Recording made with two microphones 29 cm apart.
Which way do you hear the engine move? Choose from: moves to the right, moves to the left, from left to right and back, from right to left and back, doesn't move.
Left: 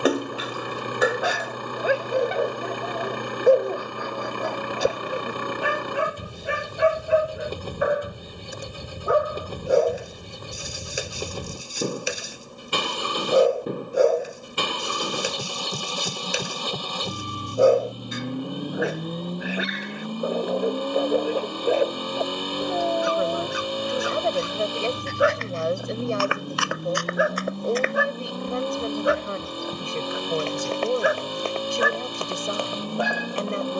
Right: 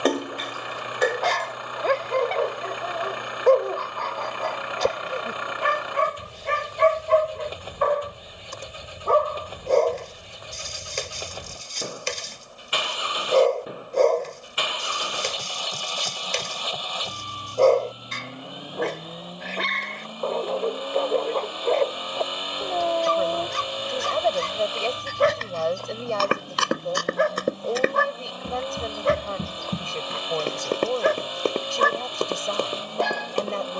doesn't move.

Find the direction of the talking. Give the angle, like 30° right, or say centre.
20° left.